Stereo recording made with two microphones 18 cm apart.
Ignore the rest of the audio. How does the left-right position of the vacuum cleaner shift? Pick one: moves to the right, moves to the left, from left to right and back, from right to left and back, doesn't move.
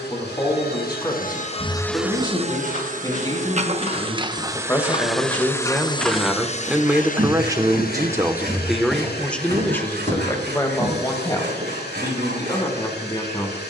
from left to right and back.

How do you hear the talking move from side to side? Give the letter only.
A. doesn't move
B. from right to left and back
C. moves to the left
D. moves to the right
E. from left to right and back
E.